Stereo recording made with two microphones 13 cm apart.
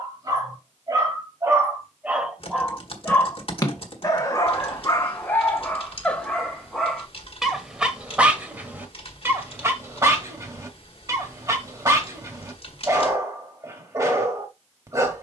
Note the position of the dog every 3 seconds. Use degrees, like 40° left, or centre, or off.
20° right, 20° left, centre, 20° right, 20° right.